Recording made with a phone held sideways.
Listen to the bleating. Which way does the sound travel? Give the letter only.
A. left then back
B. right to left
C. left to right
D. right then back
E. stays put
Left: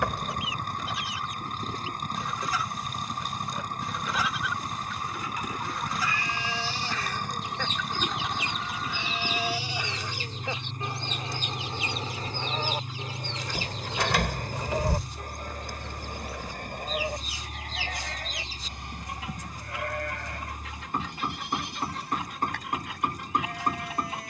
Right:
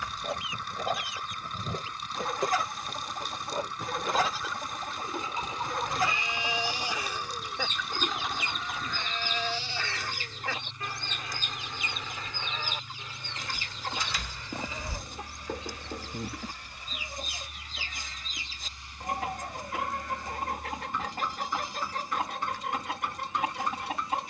B.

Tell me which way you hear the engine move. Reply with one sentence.
You can hear the engine stay in one place.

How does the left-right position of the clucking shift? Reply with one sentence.
You can hear the clucking stay put.